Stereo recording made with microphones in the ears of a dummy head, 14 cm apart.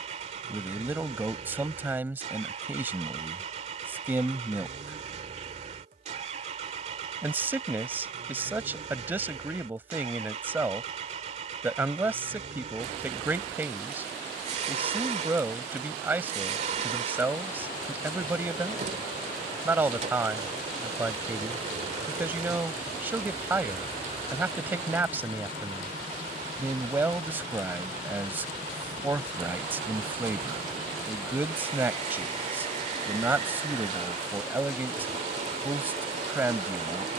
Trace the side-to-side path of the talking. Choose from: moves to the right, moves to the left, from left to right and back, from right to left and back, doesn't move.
doesn't move.